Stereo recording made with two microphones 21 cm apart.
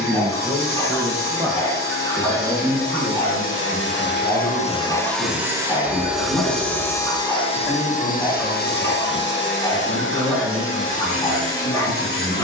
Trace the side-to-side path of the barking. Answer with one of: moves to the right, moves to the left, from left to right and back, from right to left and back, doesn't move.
doesn't move.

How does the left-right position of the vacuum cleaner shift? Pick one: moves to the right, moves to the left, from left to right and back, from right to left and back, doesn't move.
from left to right and back.